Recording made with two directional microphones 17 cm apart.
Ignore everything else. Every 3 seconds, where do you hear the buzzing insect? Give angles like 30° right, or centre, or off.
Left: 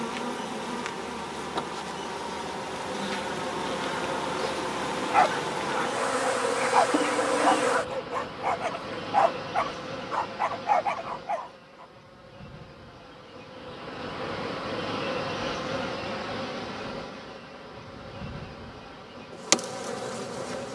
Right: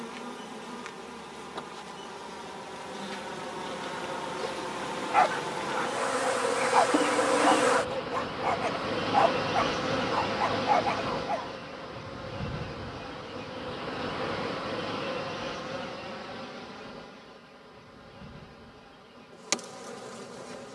40° left, 20° left, 10° right, 40° right, 20° right, 30° left, 40° left.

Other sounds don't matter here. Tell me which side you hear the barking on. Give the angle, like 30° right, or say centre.
10° left.